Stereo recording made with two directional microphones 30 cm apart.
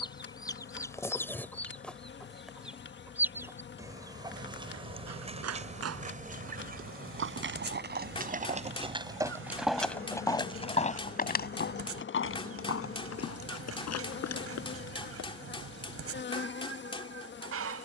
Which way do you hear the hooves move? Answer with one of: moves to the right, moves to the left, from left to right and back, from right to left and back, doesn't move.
moves to the left.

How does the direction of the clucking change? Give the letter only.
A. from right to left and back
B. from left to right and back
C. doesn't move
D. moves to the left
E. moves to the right
E.